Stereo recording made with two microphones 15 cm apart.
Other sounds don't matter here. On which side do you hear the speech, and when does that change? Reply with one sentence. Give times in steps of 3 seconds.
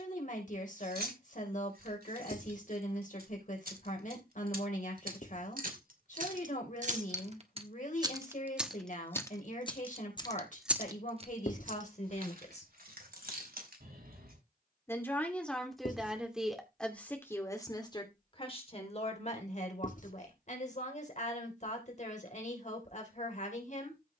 In this clip you hear the speech on the left from 0 s, in the centre from 15 s and on the left from 18 s.